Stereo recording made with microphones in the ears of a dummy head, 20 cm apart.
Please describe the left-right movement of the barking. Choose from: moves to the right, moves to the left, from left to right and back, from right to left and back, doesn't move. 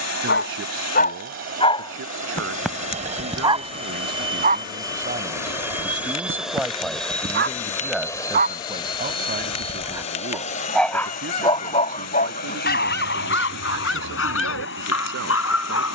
from left to right and back.